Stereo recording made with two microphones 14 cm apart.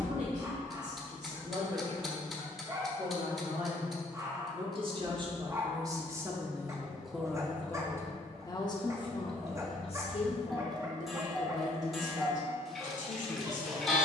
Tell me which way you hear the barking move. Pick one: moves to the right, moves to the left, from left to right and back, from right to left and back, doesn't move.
doesn't move.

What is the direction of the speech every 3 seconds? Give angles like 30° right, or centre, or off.
60° right, 40° right, 10° left, 50° left, 60° left.